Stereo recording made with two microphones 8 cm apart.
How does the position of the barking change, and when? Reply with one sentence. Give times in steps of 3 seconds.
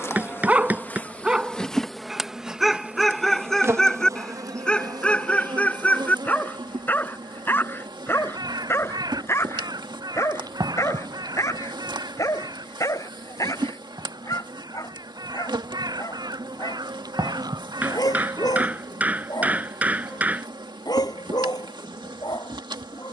You can hear the barking in the centre from 0 s and on the left from 6 s.